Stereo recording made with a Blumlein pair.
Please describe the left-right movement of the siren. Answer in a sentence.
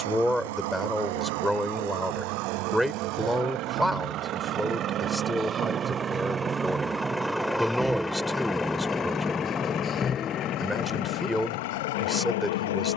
In this clip you hear the siren move to the left.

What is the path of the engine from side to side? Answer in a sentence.
In this clip you hear the engine move to the left.